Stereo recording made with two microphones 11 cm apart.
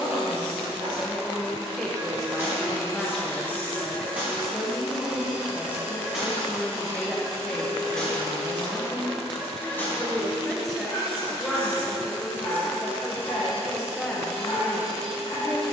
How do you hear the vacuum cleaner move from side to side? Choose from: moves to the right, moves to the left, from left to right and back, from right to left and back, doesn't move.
moves to the right.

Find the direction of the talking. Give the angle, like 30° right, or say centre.
centre.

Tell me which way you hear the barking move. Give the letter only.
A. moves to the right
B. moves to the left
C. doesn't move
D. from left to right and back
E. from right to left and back
B.